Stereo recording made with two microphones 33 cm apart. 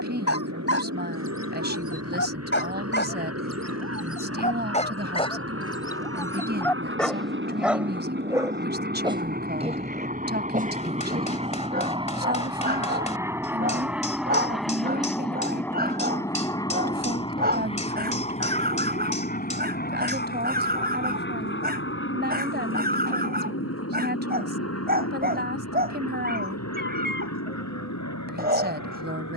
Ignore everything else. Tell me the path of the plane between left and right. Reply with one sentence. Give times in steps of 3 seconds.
You can hear the plane on the right from 0 s, in the centre from 12 s and on the left from 18 s.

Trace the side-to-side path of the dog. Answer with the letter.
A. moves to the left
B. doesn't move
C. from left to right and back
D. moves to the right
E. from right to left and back
D.